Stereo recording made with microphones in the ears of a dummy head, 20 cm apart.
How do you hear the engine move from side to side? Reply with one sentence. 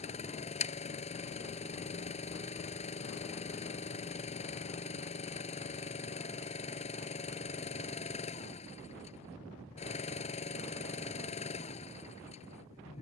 You can hear the engine stay put.